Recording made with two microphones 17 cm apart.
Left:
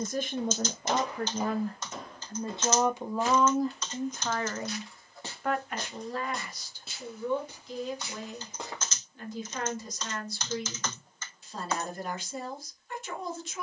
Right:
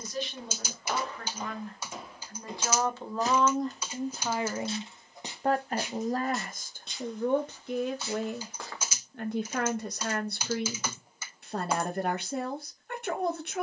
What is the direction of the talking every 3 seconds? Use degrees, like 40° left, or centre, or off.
30° left, 10° right, 50° right, 60° right, 60° right.